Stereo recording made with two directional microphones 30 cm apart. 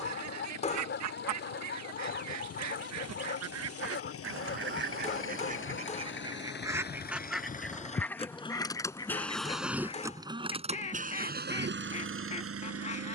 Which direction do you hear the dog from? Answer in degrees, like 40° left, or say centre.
40° left.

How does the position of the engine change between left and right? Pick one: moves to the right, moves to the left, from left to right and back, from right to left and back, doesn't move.
moves to the right.